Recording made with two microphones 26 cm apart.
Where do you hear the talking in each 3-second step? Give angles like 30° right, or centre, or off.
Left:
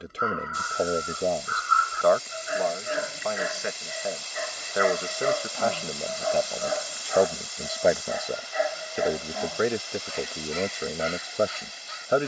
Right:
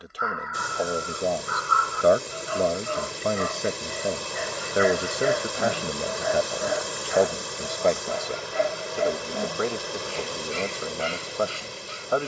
centre, 30° right, centre, 20° left.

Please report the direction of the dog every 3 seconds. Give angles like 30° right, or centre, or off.
30° left, centre, 20° right, 30° right.